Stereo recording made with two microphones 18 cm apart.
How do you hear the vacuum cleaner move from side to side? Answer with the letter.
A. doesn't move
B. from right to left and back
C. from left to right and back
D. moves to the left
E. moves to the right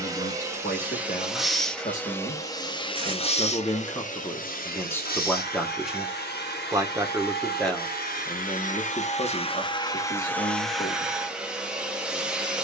B.